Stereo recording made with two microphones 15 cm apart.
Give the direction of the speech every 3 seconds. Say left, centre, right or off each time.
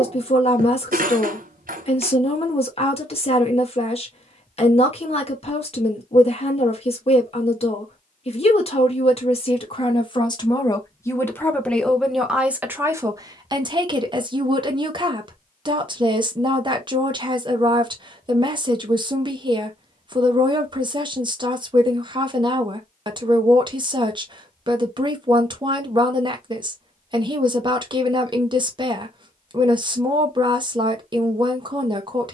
left, left, left, left, right, right, right, right, right, right, right.